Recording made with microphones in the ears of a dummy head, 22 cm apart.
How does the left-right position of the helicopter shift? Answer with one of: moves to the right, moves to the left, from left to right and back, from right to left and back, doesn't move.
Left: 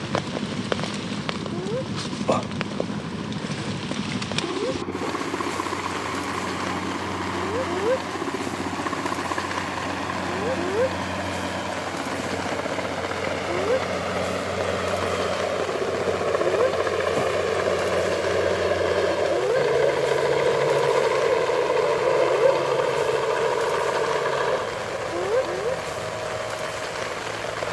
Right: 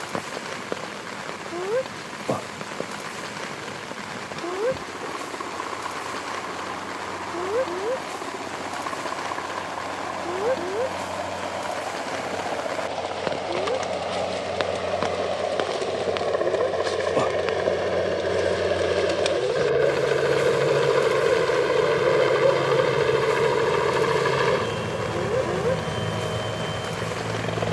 moves to the right.